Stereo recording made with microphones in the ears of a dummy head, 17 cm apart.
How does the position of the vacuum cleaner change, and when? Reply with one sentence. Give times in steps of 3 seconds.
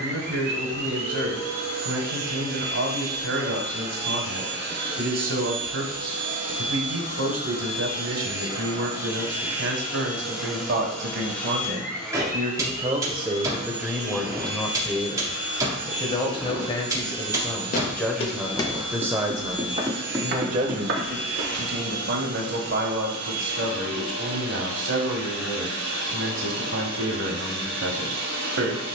You can hear the vacuum cleaner on the right from 0 s, in the centre from 9 s and on the right from 12 s.